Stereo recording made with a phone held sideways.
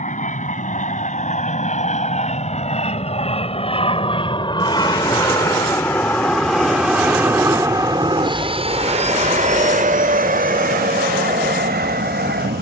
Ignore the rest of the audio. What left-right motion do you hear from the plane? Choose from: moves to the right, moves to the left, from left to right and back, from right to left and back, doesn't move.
moves to the right.